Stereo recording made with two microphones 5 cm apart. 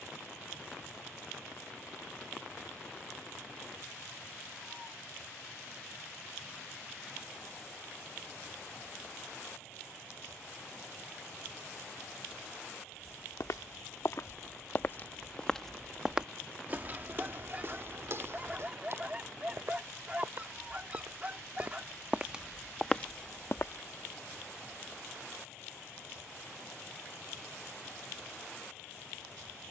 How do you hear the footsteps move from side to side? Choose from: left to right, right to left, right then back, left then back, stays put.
right then back.